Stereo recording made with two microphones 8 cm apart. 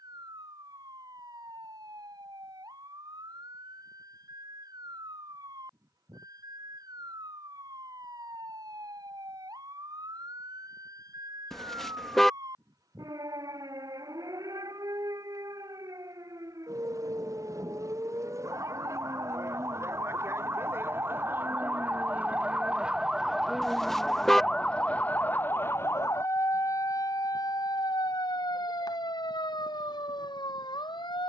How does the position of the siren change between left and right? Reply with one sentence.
In this clip you hear the siren move from right to left.